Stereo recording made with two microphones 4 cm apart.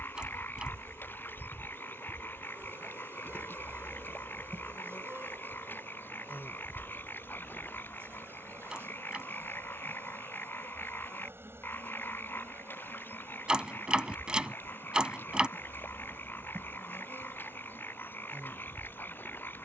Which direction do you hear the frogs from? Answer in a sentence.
In this clip you hear the frogs on the left.